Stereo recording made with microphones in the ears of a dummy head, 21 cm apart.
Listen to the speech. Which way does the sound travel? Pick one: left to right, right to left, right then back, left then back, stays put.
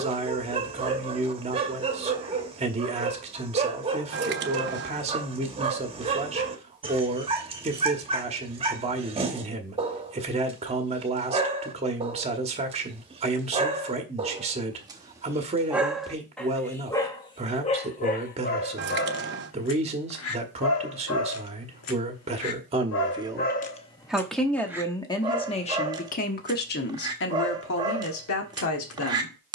right to left.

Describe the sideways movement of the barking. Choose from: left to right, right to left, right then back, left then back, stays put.
left then back.